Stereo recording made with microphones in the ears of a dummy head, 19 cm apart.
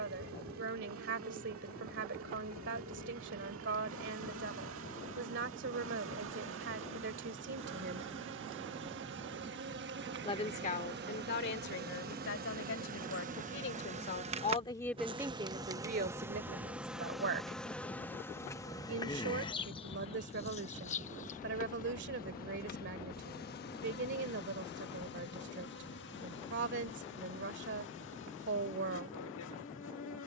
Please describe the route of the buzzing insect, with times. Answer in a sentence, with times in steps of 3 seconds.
In this clip you hear the buzzing insect on the right from 0 s, in the centre from 15 s and on the left from 18 s.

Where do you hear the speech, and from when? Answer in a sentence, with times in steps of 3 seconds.
In this clip you hear the speech on the right from 0 s, on the left from 9 s and on the right from 15 s.